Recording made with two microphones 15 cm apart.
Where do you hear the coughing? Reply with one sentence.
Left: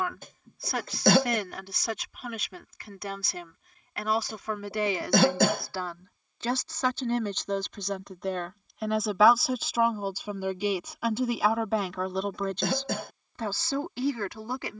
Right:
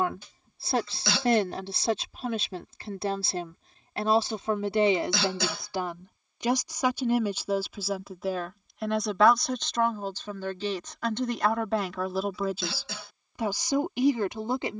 In this clip you hear the coughing on the left.